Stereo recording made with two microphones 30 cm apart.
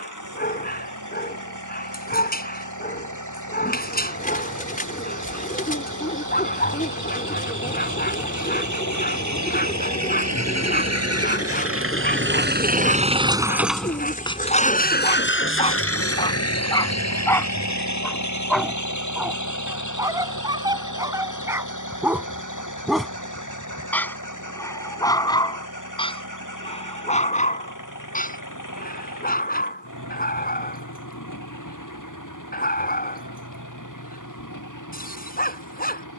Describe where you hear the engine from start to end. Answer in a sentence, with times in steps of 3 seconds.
You can hear the engine on the right from 0 s, in the centre from 12 s and on the left from 15 s.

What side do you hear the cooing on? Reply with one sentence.
In this clip you hear the cooing on the left.